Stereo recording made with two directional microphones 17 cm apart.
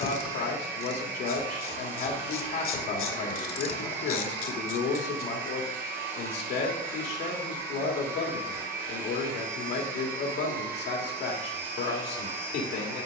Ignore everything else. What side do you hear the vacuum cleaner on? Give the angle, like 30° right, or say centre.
60° right.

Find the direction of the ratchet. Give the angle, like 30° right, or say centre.
60° left.